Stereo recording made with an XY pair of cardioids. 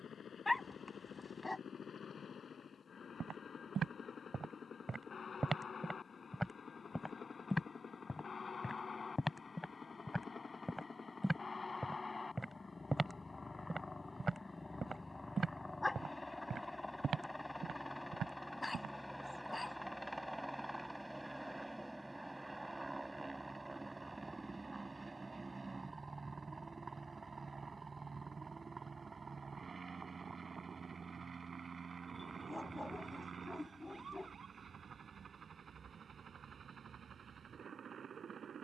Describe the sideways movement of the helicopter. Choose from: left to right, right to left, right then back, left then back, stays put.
left to right.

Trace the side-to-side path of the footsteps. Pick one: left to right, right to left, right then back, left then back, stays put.
left then back.